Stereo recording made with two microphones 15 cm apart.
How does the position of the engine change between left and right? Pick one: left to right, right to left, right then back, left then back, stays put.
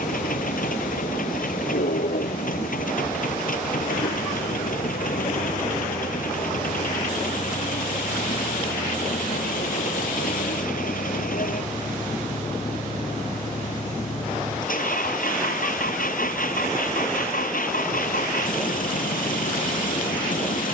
stays put.